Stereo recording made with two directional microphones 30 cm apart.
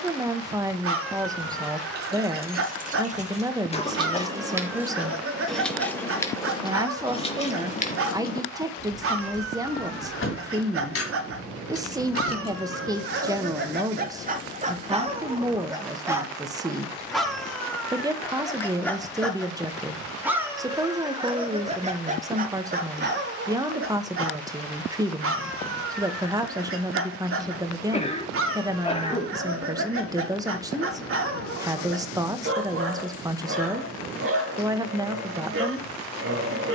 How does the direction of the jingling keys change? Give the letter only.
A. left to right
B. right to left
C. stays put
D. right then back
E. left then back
B.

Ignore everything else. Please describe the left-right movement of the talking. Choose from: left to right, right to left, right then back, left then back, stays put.
stays put.